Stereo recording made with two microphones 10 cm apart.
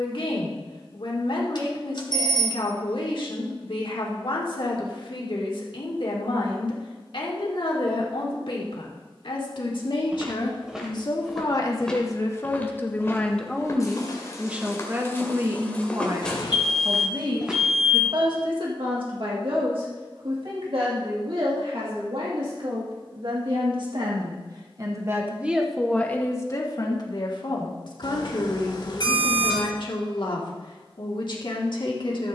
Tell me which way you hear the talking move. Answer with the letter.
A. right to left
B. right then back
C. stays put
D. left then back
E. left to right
B.